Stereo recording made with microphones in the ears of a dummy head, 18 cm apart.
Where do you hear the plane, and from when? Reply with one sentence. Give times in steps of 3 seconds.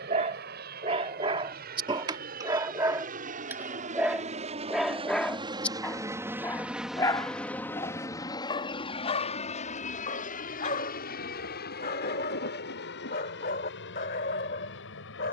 You can hear the plane on the right from 0 s, in the centre from 6 s and on the left from 9 s.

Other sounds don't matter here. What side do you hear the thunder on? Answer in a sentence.
In this clip you hear the thunder on the left.